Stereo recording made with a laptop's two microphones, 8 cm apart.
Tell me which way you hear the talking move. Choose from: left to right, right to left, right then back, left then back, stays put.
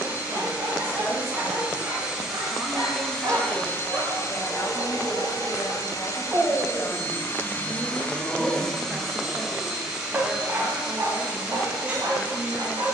left then back.